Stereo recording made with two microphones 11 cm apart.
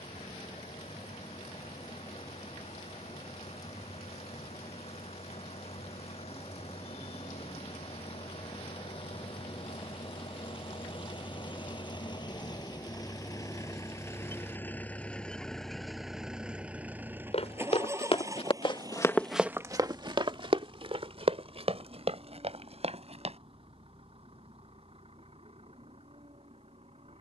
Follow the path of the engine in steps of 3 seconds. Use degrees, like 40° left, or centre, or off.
80° left, 70° left, 70° left, 50° left, 30° left, 10° right, 40° right, 60° right, 60° right.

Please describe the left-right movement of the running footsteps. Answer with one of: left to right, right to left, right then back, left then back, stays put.
left to right.